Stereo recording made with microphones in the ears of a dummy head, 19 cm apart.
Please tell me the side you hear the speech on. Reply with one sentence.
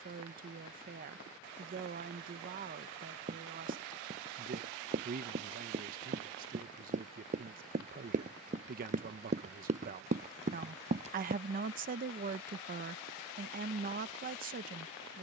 In this clip you hear the speech on the right.